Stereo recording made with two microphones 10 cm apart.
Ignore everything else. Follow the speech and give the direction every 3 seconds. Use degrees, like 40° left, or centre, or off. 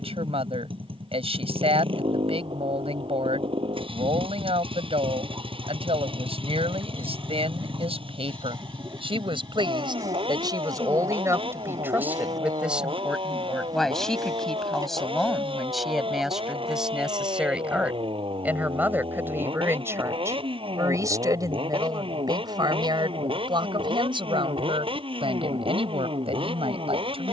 70° right, 70° right, 70° right, 40° right, centre, centre, 20° right, 40° right, 60° right.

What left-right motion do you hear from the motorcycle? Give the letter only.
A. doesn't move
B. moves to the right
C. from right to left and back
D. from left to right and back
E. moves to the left
A.